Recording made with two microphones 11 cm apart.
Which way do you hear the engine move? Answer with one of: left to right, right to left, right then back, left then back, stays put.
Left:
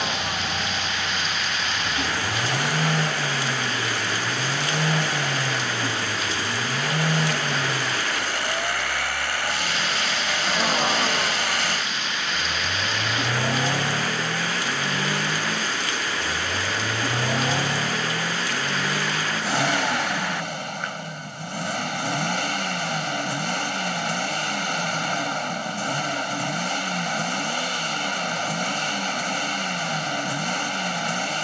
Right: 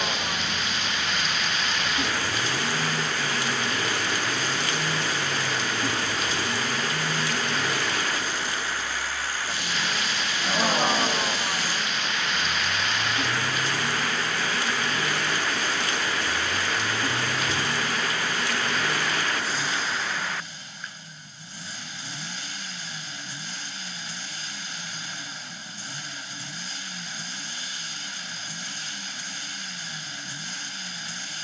stays put.